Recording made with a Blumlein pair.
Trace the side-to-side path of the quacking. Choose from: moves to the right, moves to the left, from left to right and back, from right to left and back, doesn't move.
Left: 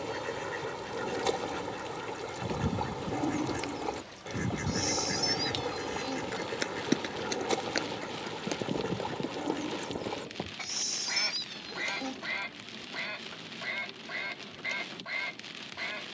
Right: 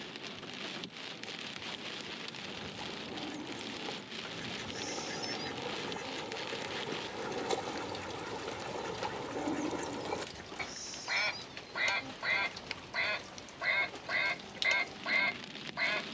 moves to the right.